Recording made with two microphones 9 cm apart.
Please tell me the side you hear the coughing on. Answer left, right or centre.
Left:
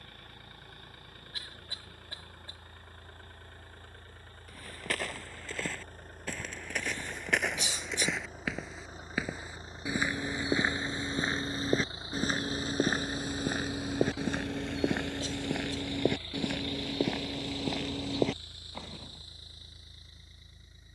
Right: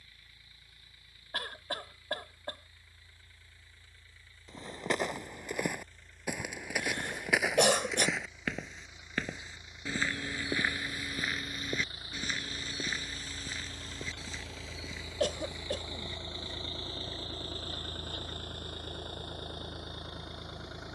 right.